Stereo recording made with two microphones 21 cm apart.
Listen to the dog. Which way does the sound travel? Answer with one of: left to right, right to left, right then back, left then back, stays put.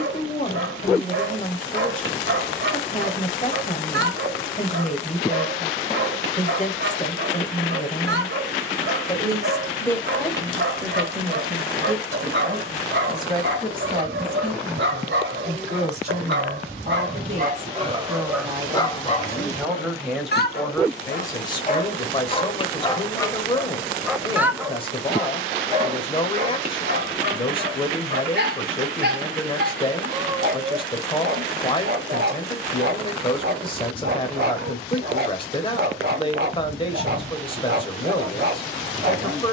left then back.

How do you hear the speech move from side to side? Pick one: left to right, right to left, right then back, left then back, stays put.
right then back.